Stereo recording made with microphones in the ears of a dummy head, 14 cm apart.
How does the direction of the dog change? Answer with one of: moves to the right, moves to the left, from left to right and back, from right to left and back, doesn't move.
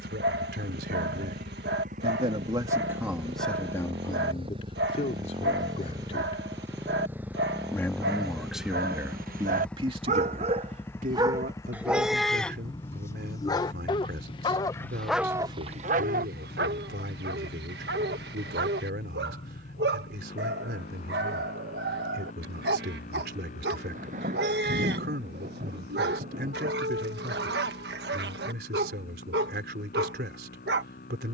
from right to left and back.